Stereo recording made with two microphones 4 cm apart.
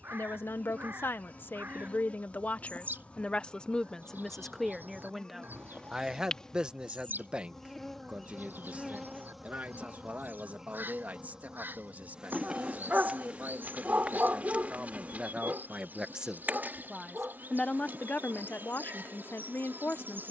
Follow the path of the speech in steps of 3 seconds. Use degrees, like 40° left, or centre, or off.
50° left, 10° left, 30° right, 40° right, 40° right, 10° right, 60° left.